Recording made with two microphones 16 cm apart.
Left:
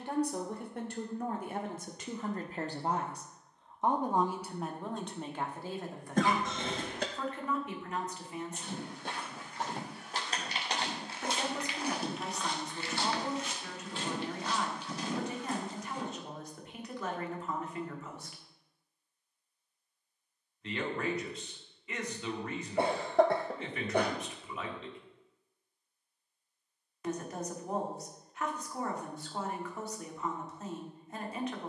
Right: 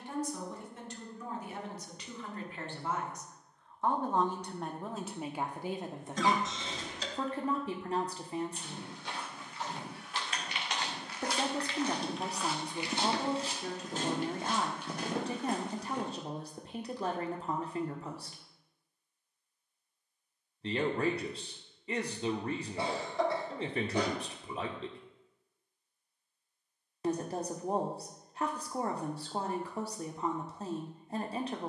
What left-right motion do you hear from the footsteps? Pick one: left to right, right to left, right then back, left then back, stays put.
left to right.